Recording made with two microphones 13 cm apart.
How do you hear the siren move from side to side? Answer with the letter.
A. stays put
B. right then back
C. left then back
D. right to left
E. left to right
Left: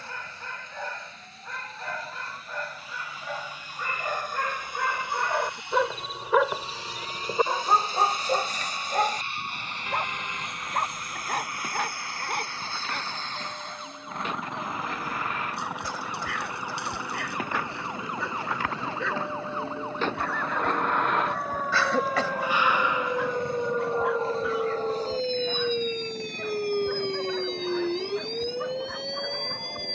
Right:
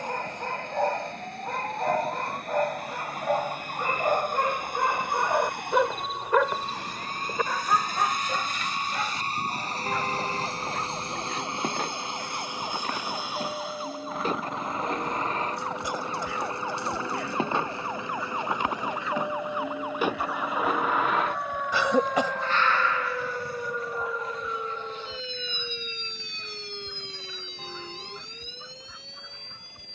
D.